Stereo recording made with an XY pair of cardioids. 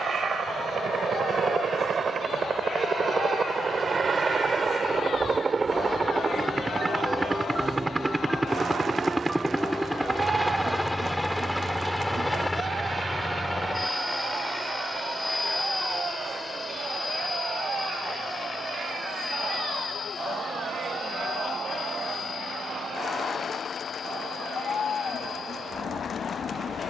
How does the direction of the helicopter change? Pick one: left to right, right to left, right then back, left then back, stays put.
right to left.